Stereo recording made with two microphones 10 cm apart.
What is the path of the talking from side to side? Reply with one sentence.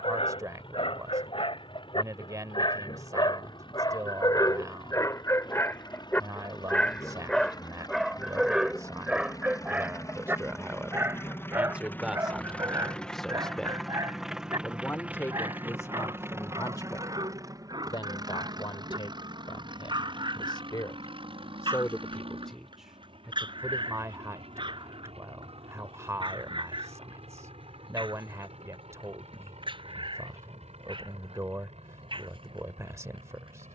You can hear the talking go left and come back.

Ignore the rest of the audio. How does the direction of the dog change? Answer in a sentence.
You can hear the dog move to the right.